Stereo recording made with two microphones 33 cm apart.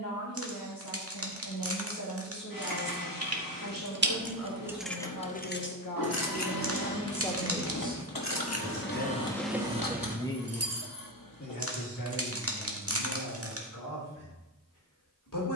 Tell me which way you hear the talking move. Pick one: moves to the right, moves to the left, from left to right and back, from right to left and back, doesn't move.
from left to right and back.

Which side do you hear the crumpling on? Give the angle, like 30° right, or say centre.
40° right.